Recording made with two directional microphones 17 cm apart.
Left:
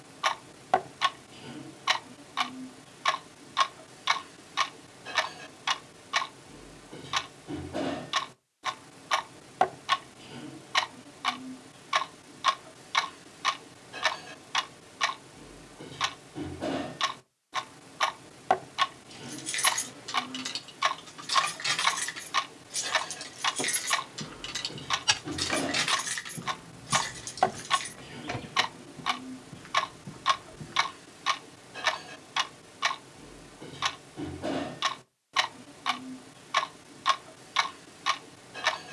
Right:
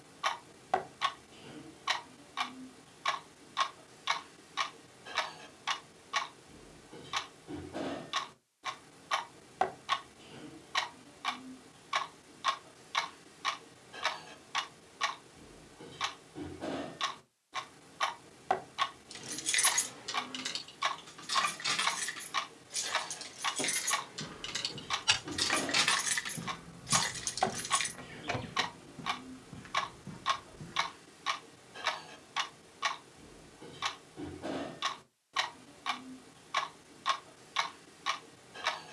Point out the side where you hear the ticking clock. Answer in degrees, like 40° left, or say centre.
30° left.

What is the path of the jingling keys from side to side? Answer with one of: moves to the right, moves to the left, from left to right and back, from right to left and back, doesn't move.
from right to left and back.